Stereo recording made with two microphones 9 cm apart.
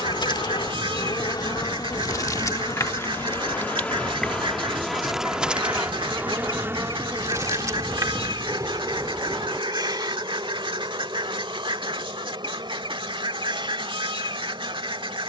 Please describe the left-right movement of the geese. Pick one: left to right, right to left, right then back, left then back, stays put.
stays put.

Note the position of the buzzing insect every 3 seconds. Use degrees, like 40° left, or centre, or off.
50° left, 10° left, 30° right, 50° right, 60° right.